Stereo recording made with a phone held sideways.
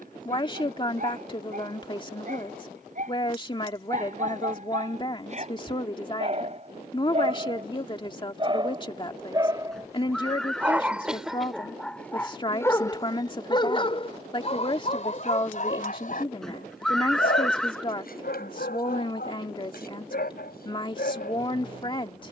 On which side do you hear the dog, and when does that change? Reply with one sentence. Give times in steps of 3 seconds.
In this clip you hear the dog on the right from 0 s, in the centre from 9 s and on the left from 12 s.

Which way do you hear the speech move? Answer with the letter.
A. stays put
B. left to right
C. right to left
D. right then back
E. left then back
A.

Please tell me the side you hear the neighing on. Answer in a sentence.
In this clip you hear the neighing in the centre.